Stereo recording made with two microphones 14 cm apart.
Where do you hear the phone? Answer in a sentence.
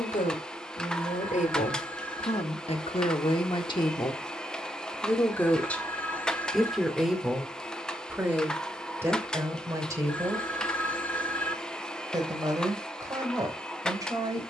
In this clip you hear the phone in the centre.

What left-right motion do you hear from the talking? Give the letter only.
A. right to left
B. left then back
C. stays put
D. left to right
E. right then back
D.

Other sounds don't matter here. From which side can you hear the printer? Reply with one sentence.
In this clip you hear the printer in the centre.